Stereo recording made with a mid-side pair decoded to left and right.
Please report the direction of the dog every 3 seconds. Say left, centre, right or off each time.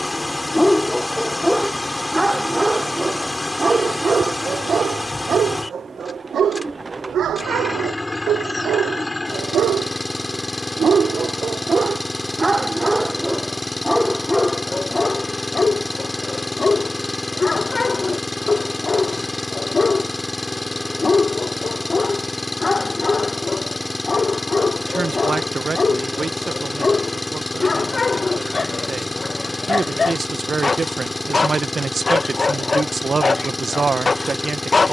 centre, right, right, right, centre, left, left, left, left, left, left, left.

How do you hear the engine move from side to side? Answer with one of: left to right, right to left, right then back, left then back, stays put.
stays put.